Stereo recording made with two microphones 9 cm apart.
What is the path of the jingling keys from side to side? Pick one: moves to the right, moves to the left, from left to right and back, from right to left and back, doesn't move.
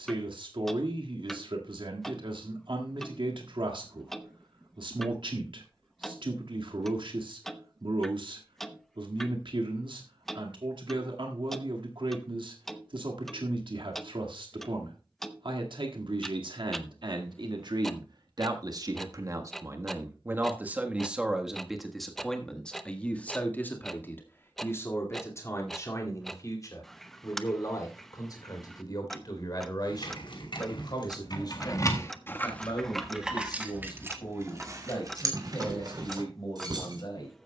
moves to the right.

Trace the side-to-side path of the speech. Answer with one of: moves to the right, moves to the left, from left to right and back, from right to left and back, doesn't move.
moves to the left.